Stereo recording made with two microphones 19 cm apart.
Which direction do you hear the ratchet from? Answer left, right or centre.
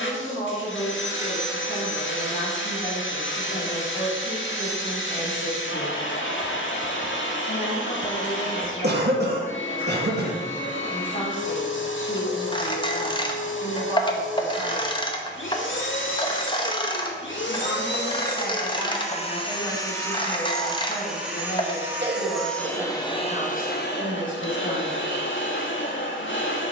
left.